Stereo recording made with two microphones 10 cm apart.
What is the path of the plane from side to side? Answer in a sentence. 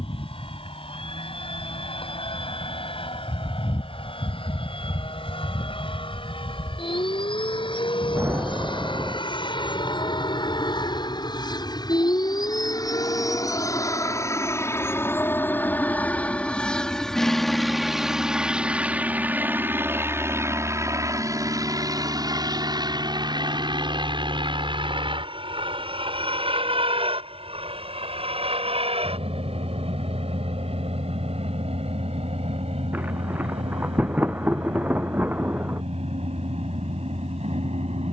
You can hear the plane travel towards the right.